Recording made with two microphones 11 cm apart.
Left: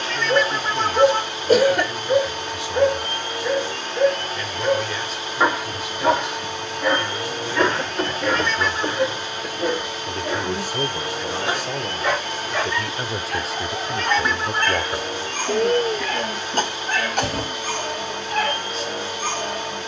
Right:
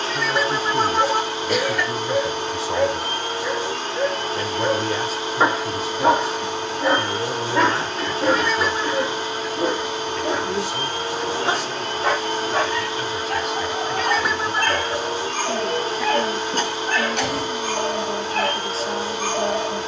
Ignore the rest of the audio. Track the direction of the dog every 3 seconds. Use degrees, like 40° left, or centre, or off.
30° left, 10° right, 30° right, 40° right, 50° right, 50° right, 50° right.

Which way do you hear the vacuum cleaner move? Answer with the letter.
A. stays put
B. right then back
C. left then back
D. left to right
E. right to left
A.